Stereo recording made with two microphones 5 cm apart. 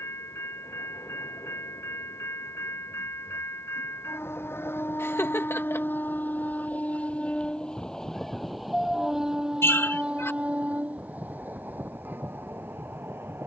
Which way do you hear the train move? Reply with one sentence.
You can hear the train travel towards the right.